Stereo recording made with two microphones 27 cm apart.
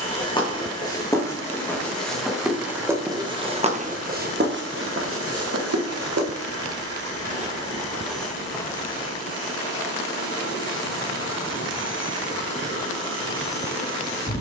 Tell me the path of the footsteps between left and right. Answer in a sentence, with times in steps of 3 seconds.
You can hear the footsteps in the centre from 0 s, on the right from 3 s and not at all from 9 s.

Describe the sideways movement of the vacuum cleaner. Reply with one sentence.
In this clip you hear the vacuum cleaner stay put.